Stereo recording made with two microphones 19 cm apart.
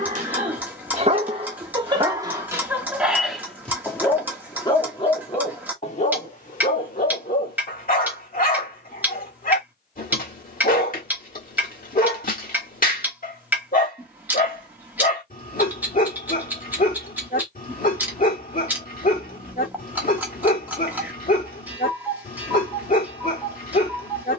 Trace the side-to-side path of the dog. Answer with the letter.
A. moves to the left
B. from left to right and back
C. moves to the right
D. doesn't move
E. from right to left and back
A.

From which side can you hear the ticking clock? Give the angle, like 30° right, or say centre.
10° right.